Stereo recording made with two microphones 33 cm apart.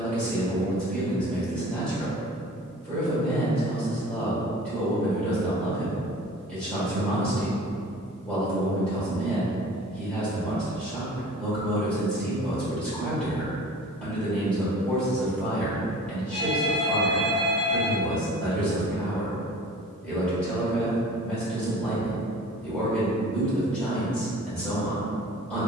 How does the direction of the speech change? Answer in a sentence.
You can hear the speech stay in one place.